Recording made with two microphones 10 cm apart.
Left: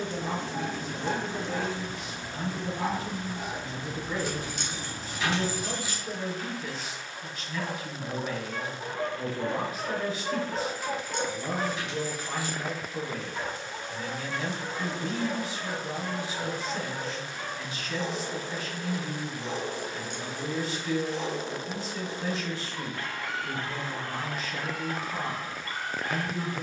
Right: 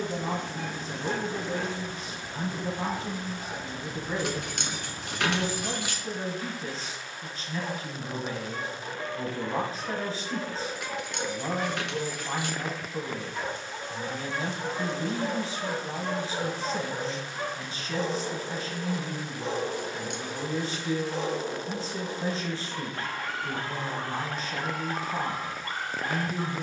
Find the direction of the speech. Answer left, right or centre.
right.